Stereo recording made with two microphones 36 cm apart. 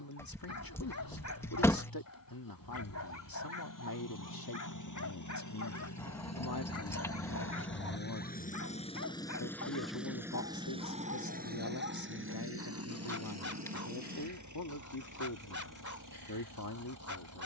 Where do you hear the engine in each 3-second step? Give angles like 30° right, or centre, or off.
70° left, 60° left, 30° left, 10° right, 50° right, 60° right.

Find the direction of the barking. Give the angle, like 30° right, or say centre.
50° left.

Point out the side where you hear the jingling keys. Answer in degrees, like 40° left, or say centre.
10° left.